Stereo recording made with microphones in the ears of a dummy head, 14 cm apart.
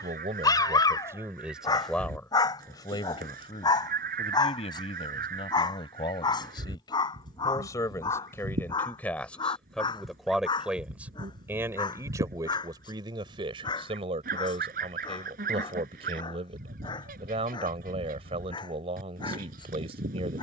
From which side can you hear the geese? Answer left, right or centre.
right.